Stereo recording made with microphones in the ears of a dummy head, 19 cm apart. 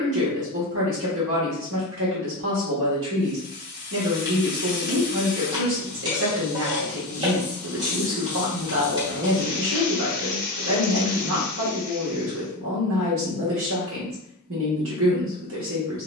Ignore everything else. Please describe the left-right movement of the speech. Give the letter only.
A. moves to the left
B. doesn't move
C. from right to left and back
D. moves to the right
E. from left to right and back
B.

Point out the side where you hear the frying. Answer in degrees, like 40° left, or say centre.
20° right.